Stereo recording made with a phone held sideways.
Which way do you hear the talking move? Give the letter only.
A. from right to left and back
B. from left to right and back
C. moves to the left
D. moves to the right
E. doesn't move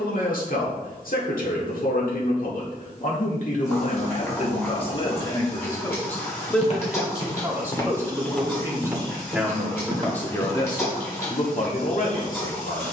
B.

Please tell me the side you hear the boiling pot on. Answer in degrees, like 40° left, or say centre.
20° left.